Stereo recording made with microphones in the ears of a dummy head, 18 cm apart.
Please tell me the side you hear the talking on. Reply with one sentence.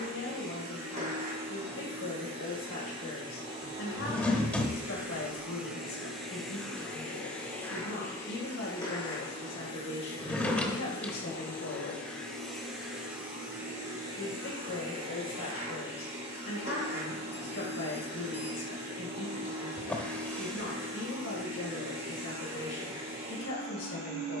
You can hear the talking on the left.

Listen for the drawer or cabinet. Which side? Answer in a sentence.
In this clip you hear the drawer or cabinet in the centre.